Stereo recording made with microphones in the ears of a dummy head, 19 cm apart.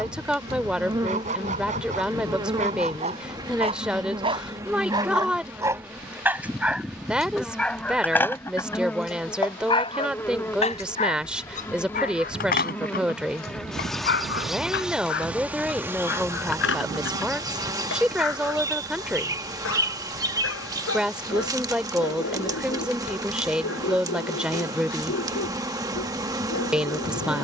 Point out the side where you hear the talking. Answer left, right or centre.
centre.